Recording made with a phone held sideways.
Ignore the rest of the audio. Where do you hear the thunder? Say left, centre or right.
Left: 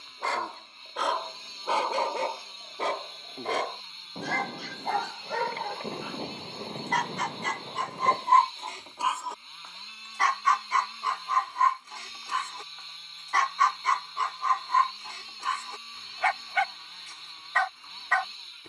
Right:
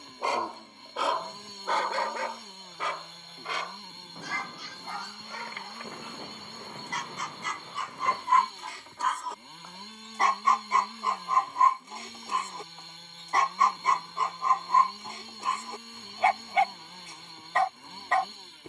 left.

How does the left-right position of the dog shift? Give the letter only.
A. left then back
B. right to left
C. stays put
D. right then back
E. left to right
A.